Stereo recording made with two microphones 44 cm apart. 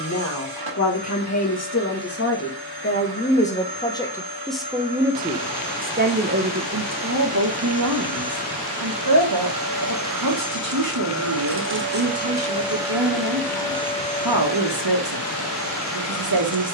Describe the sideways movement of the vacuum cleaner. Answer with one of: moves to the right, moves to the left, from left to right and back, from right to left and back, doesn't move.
moves to the left.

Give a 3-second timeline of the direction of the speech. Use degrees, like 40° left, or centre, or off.
30° left, centre, 40° right, 50° right, 50° right, 50° right.